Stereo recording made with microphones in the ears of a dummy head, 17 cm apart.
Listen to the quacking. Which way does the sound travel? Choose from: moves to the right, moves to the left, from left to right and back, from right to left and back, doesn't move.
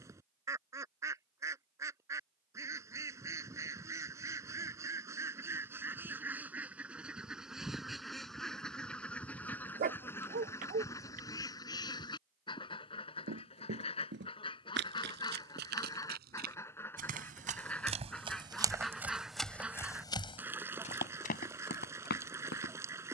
from right to left and back.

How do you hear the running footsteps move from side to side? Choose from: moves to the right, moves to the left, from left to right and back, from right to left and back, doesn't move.
moves to the left.